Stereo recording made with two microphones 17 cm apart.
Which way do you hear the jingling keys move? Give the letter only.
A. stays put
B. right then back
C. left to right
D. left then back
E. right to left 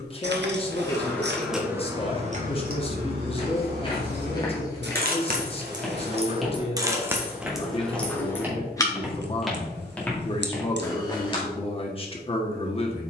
B.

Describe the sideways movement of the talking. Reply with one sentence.
In this clip you hear the talking stay put.